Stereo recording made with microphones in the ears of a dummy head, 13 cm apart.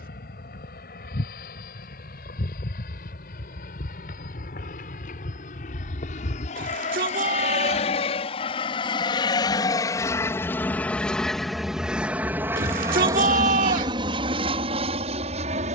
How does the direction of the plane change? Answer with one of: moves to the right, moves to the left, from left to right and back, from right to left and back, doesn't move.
moves to the right.